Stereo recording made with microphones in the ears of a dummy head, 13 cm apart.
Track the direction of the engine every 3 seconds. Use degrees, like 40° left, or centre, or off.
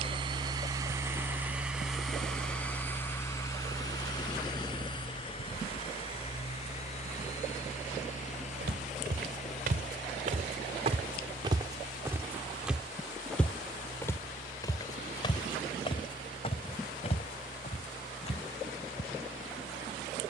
10° right, 30° left, 50° left, 60° left, 60° left, 60° left, 60° left.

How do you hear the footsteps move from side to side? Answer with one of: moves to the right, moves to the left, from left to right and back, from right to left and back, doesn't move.
moves to the left.